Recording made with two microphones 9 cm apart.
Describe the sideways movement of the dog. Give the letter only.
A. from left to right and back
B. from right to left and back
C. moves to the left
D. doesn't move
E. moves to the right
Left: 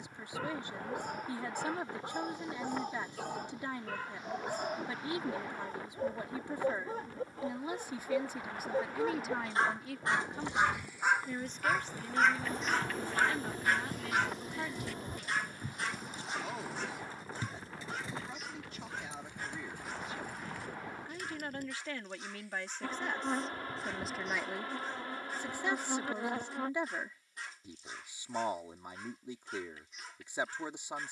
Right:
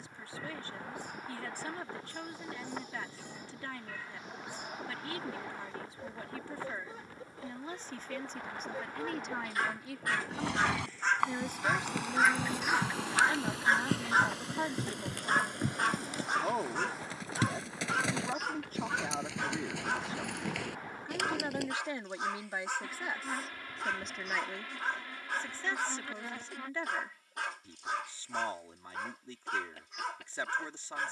E.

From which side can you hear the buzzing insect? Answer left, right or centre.
left.